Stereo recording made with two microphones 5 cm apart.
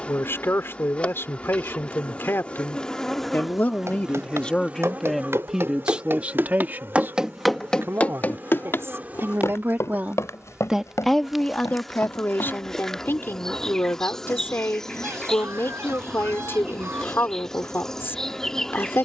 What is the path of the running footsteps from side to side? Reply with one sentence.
In this clip you hear the running footsteps move from right to left.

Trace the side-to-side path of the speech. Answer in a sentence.
You can hear the speech move from left to right and back again.